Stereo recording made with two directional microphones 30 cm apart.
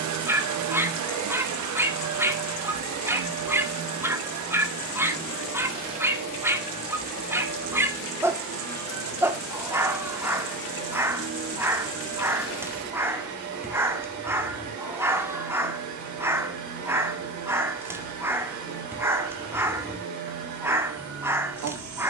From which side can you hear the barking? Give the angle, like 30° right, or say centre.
10° right.